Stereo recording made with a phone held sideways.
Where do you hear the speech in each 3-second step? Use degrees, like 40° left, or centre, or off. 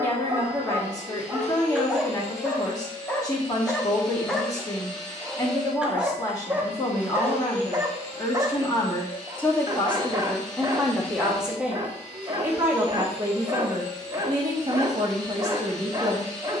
30° left, 30° left, 30° left, centre, 20° right, 30° right.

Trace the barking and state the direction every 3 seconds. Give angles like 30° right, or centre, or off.
10° right, centre, 20° right, 30° right, 30° right, 30° right.